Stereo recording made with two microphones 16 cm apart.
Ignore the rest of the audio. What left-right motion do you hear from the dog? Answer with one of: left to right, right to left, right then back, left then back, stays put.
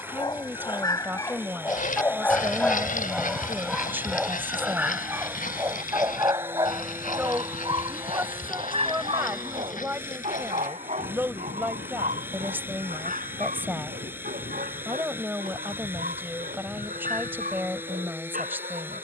left to right.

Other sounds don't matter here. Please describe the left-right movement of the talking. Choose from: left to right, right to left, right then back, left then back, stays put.
stays put.